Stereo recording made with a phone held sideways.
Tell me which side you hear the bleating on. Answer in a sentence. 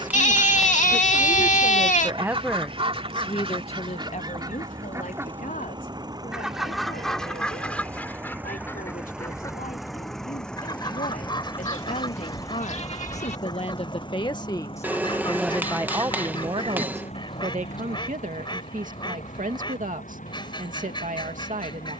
In this clip you hear the bleating on the left.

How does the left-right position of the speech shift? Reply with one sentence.
In this clip you hear the speech go left and come back.